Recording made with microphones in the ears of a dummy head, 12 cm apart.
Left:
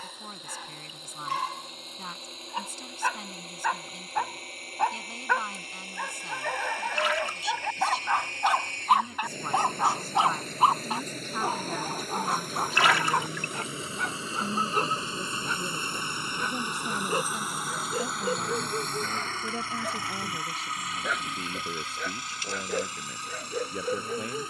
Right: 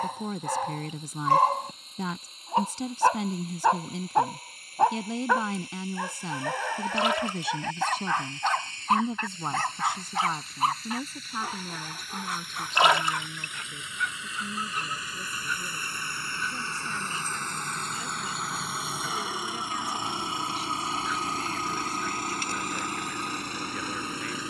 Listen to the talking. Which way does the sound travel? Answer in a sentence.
In this clip you hear the talking move to the left.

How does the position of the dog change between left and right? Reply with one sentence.
In this clip you hear the dog go from the right side to the left.